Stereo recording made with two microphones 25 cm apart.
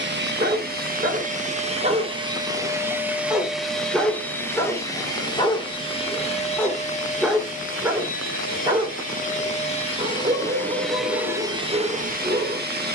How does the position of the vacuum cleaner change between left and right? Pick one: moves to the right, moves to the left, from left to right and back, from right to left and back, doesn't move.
from right to left and back.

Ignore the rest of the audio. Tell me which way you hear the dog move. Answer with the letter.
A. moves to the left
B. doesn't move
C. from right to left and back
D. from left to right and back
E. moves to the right
C.